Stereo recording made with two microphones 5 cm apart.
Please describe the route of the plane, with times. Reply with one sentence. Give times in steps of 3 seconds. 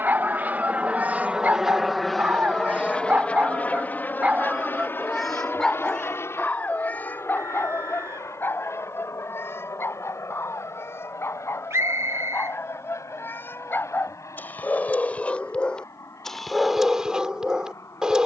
You can hear the plane in the centre from 0 s and on the left from 3 s.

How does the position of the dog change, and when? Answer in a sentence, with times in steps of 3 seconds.
You can hear the dog on the right from 0 s, in the centre from 3 s, on the left from 6 s and in the centre from 15 s.